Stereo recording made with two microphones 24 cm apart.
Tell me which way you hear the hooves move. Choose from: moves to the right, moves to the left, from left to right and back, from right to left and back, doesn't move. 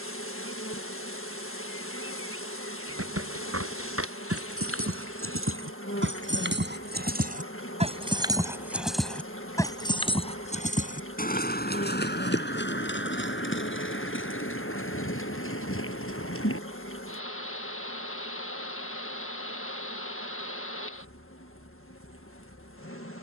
moves to the left.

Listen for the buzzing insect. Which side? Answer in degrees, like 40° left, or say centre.
60° left.